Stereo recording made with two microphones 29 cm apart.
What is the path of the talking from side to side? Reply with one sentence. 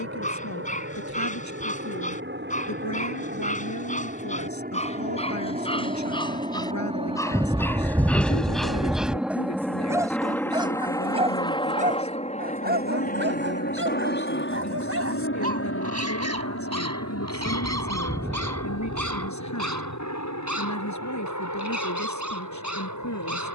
In this clip you hear the talking stay put.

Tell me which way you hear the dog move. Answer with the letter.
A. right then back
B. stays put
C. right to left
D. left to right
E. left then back
D.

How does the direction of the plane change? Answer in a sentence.
You can hear the plane go from the right side to the left.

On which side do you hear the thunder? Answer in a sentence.
In this clip you hear the thunder in the centre.